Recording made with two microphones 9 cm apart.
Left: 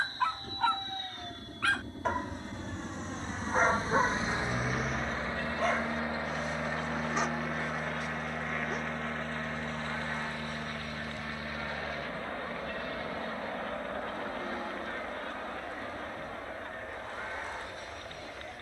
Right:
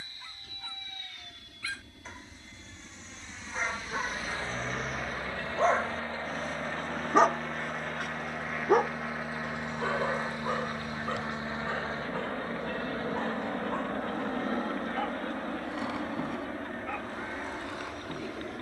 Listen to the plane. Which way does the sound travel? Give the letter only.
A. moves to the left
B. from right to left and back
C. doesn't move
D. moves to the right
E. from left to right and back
D.